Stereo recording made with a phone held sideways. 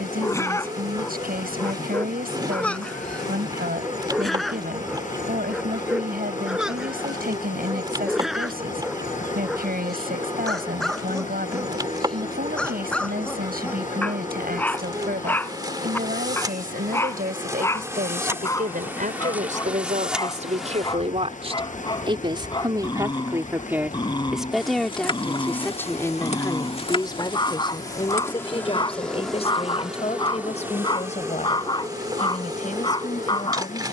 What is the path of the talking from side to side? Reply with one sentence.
In this clip you hear the talking travel towards the left.